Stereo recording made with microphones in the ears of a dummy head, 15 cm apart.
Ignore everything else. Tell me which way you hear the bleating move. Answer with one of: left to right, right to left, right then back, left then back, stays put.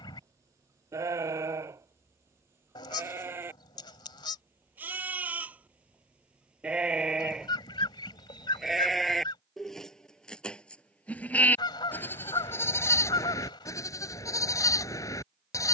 right to left.